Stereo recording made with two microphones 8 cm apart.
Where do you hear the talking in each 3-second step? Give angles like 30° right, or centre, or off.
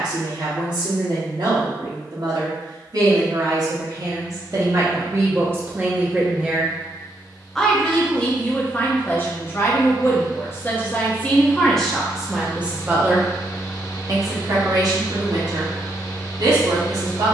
60° right, 40° right, 10° left, 20° left, 30° right, 60° right.